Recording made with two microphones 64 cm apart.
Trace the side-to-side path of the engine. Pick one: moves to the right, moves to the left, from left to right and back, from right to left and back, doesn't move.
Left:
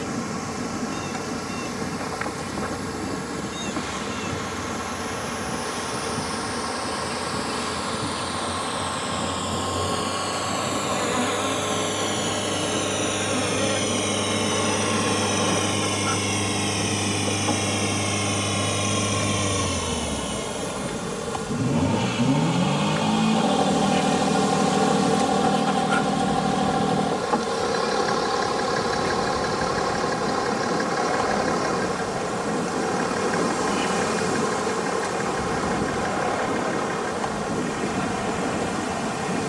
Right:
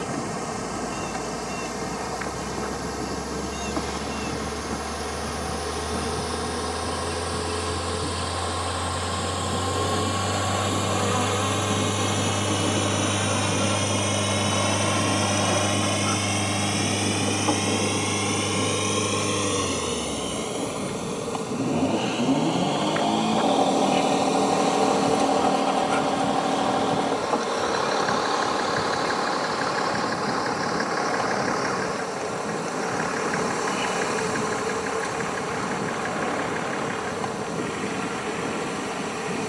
moves to the left.